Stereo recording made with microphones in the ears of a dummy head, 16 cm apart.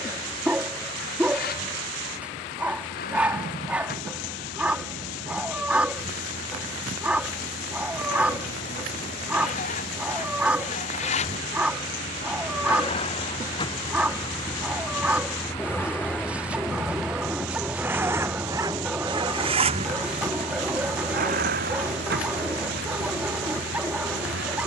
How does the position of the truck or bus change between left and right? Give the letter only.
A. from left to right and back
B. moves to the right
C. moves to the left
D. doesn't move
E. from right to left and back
B.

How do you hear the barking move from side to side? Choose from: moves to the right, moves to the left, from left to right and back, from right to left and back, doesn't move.
doesn't move.